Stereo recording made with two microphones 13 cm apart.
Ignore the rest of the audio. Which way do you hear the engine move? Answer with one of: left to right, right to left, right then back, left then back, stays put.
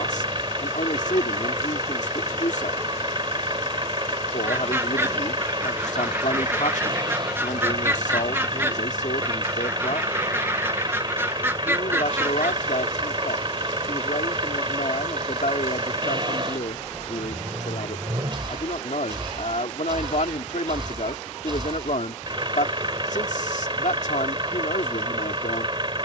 stays put.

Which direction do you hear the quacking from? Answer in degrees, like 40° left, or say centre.
20° right.